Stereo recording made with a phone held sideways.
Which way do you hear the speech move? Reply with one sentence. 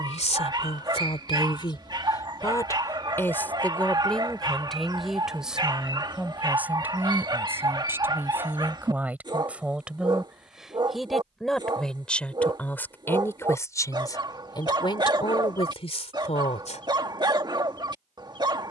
In this clip you hear the speech go right and come back.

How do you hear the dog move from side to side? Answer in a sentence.
You can hear the dog stay put.